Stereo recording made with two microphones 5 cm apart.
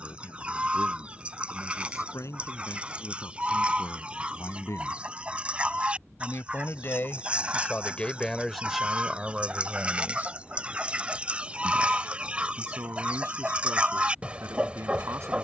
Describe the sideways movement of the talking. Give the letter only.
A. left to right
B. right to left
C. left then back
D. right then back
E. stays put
A.